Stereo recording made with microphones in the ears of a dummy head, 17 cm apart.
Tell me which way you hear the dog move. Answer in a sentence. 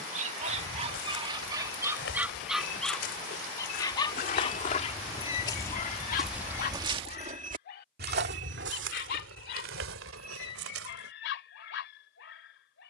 In this clip you hear the dog travel towards the left.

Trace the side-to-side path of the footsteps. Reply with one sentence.
You can hear the footsteps go from the left side to the right.